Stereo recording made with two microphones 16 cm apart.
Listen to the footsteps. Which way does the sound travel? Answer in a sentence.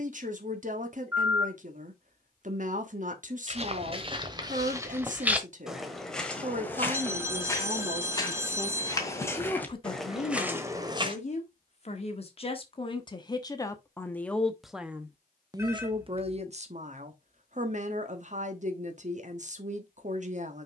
In this clip you hear the footsteps move from right to left and back again.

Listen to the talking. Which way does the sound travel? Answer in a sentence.
In this clip you hear the talking move from right to left and back again.